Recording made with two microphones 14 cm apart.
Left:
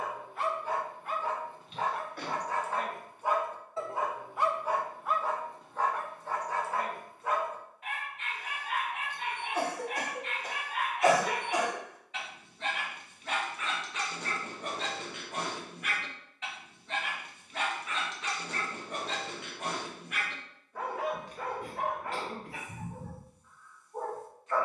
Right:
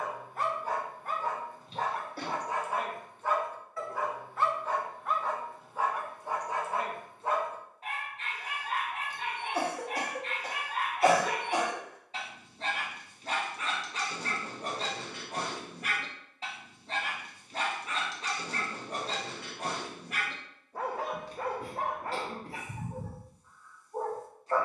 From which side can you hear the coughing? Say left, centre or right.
right.